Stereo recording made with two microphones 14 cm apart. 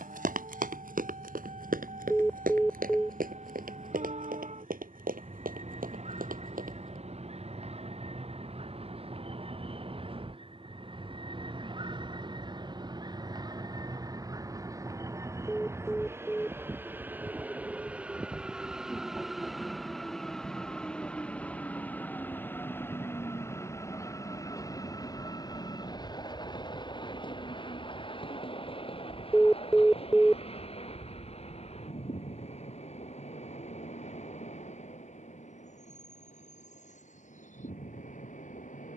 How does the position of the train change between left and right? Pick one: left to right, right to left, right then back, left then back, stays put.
right to left.